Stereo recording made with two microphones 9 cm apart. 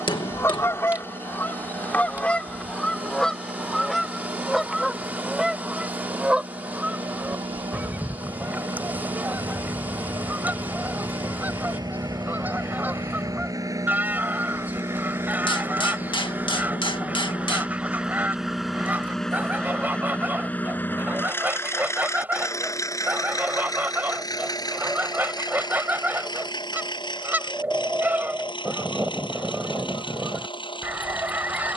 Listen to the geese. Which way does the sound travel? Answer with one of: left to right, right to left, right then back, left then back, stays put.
left to right.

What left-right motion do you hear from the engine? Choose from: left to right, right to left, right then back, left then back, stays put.
right to left.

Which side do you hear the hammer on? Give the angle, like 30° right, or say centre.
70° left.